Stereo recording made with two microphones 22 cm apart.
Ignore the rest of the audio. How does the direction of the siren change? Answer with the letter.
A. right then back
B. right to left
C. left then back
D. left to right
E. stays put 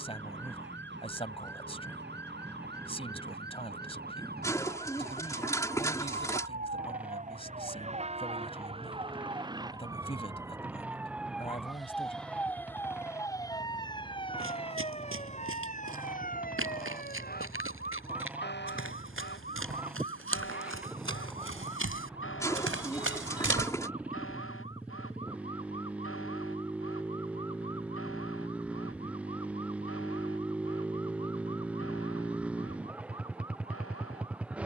B.